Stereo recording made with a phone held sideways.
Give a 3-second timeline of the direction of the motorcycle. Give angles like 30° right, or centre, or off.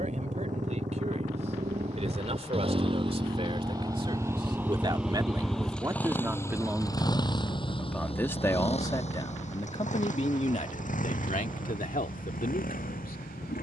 50° right, 10° right, 30° left, 50° left, 60° left.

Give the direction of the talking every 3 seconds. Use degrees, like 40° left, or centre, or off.
50° right, 30° right, centre, 50° left, 70° left.